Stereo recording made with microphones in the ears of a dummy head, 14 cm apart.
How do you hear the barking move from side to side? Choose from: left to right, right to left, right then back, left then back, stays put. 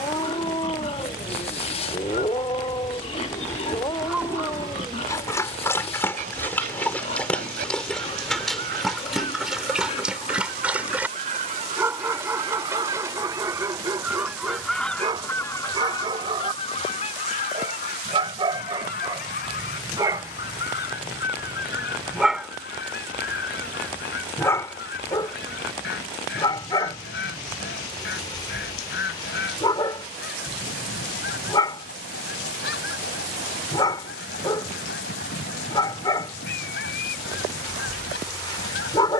right then back.